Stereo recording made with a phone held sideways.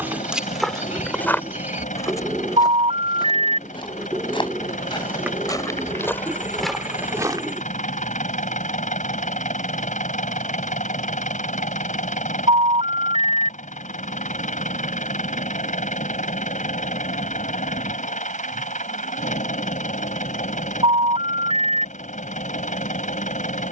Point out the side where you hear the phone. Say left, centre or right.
right.